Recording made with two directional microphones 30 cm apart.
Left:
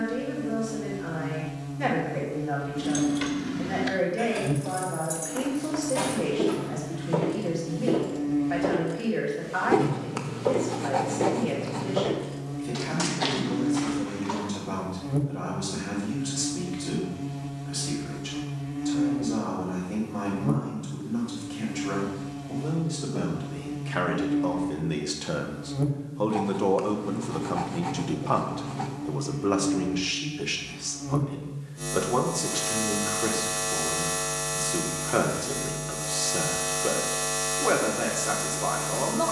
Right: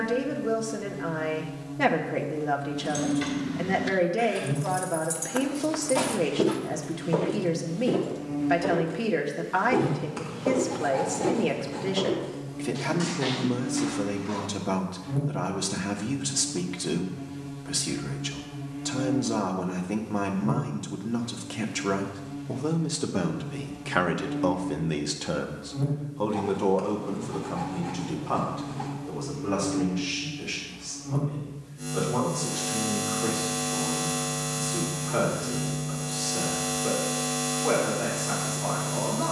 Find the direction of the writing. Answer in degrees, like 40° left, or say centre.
40° left.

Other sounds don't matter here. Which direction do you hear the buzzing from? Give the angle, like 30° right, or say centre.
50° left.